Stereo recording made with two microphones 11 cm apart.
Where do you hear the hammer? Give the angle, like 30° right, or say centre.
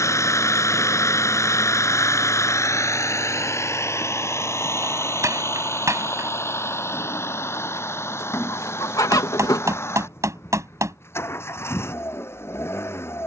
30° right.